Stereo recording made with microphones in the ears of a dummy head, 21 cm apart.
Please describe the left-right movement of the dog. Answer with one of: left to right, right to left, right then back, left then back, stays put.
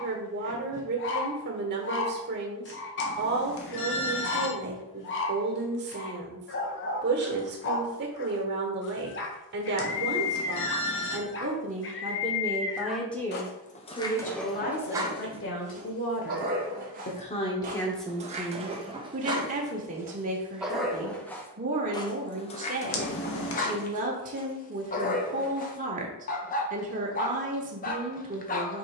right then back.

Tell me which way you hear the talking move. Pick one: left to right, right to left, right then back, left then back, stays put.
left then back.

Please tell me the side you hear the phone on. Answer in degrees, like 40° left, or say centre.
60° left.